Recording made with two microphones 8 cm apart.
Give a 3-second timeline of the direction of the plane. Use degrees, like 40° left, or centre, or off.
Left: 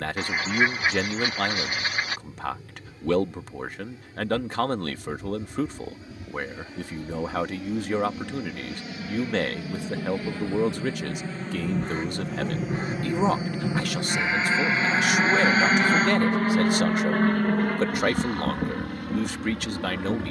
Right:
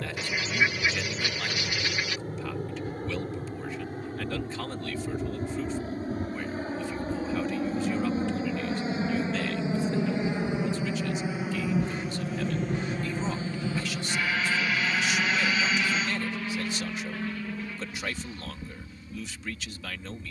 50° right, 50° right, 40° right, 20° right, 10° left, 40° left, 60° left.